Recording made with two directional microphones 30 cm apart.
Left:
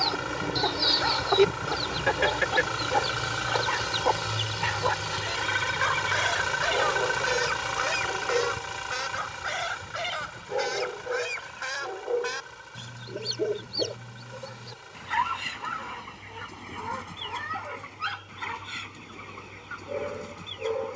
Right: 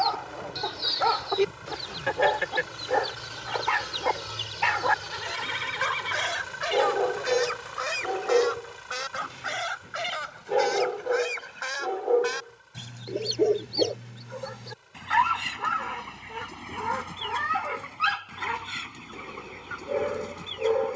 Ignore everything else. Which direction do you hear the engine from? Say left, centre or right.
left.